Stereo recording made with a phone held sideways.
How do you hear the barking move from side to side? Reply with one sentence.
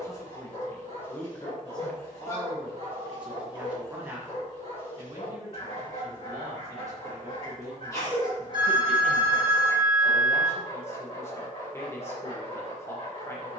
You can hear the barking stay in one place.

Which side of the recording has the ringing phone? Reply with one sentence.
In this clip you hear the ringing phone on the right.